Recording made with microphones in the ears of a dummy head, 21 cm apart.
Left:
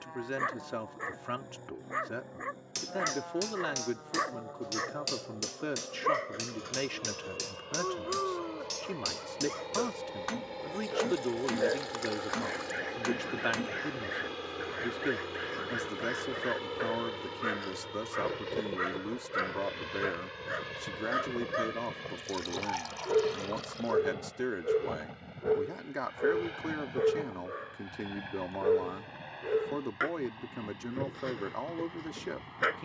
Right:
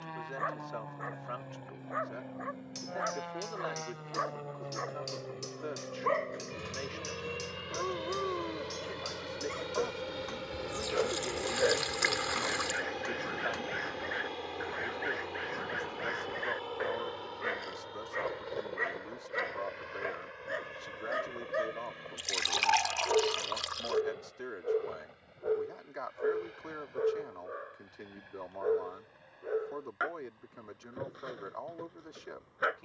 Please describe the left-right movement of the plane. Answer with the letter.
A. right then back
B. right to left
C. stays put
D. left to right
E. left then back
B.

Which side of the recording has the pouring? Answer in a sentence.
In this clip you hear the pouring on the right.